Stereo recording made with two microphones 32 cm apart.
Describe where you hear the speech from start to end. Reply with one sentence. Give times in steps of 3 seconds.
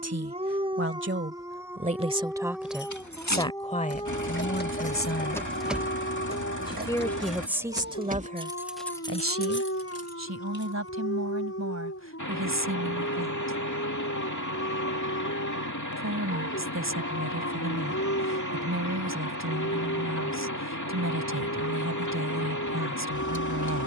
You can hear the speech on the right from 0 s, on the left from 3 s, in the centre from 6 s and on the right from 9 s.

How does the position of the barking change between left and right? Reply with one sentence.
You can hear the barking travel towards the left.